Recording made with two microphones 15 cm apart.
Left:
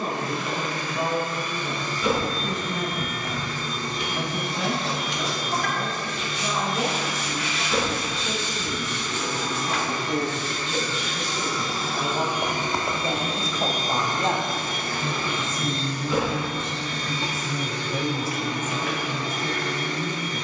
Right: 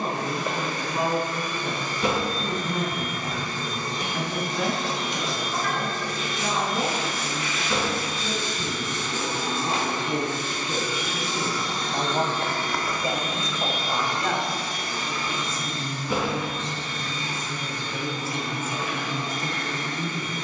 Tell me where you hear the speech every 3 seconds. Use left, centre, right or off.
right, right, right, right, centre, left, right.